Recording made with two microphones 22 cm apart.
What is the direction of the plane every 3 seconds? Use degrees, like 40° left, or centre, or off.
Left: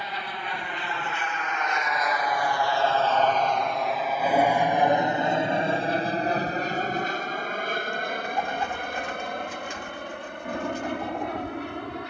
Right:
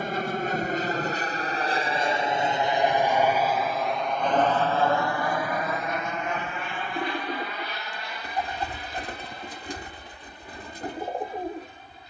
40° right, 10° left, 40° left, 60° left.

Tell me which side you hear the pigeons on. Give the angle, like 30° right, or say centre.
40° right.